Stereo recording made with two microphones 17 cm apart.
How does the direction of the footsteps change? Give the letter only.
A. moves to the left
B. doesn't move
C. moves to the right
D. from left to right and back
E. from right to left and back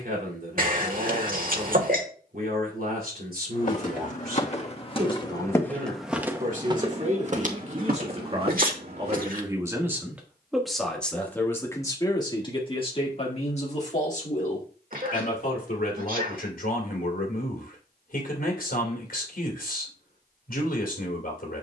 C.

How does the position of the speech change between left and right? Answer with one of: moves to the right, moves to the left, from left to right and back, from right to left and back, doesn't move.
moves to the left.